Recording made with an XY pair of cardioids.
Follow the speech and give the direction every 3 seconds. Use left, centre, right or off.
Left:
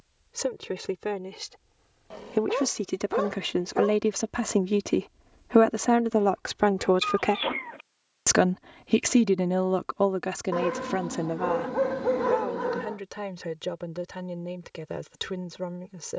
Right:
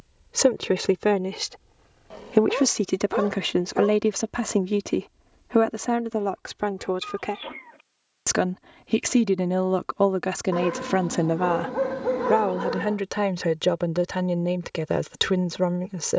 right, centre, left, right, right, right.